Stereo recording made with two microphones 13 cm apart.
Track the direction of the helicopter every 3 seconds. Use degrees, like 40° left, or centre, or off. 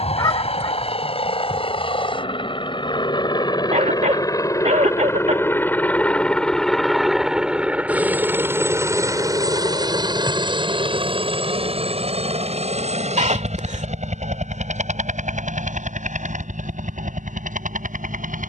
40° left, 20° left, 10° right, 40° right, 50° right, 70° right.